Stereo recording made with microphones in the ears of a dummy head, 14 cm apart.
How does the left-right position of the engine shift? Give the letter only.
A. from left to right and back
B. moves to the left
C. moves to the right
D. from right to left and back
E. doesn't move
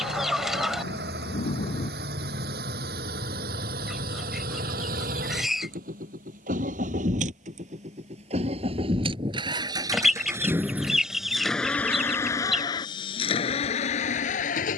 B.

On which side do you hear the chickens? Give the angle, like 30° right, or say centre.
centre.